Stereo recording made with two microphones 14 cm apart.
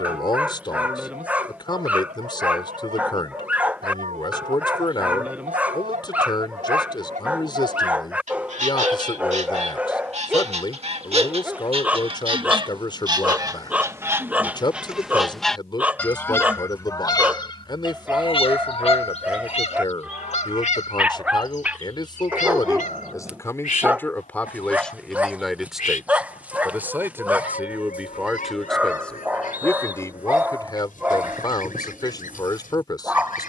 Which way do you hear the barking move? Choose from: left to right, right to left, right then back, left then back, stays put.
stays put.